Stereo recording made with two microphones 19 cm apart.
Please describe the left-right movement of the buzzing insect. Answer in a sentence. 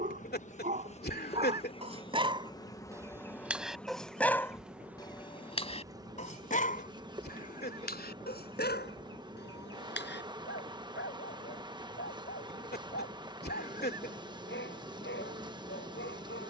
In this clip you hear the buzzing insect move to the right.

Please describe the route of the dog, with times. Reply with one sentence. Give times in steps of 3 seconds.
In this clip you hear the dog on the right from 0 s, in the centre from 3 s and on the left from 6 s.